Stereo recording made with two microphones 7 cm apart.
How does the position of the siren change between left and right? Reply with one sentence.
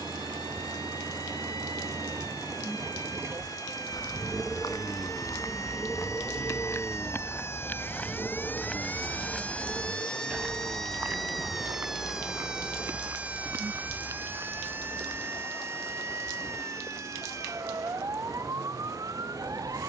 You can hear the siren go from the left side to the right.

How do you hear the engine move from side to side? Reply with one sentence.
You can hear the engine go from the right side to the left.